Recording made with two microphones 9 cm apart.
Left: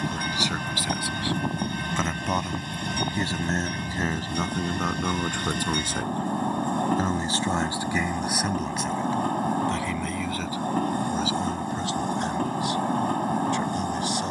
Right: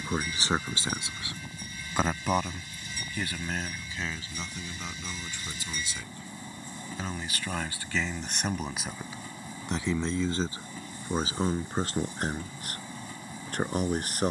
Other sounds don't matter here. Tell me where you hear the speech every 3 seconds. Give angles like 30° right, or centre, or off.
20° right, 50° left, 20° left, 30° right, 40° right.